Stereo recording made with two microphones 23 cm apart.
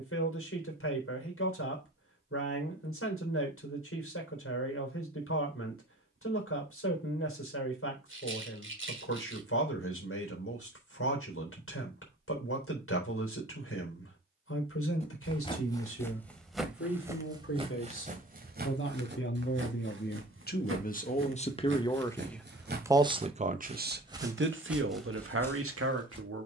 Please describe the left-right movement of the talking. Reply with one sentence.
You can hear the talking move from left to right.